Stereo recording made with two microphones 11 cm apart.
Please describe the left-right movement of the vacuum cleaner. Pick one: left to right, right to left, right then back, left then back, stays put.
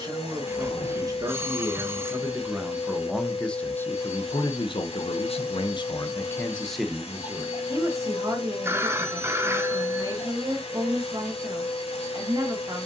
stays put.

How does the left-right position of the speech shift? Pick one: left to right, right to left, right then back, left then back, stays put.
left then back.